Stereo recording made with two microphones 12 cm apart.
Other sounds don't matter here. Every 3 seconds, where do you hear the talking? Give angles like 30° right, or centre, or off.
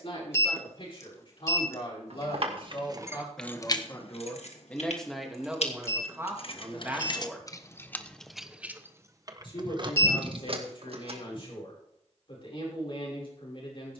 50° left, 10° left, 20° right, 50° left, 50° left.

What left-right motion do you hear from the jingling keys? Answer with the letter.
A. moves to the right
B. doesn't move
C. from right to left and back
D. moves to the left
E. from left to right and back
C.